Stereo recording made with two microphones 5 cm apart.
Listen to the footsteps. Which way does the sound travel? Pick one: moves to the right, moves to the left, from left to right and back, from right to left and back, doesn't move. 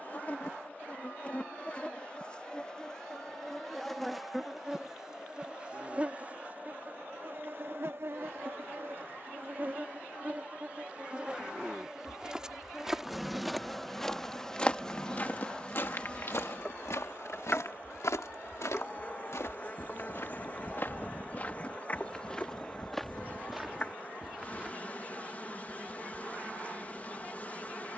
from right to left and back.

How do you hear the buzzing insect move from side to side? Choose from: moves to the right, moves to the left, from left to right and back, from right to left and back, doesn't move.
from left to right and back.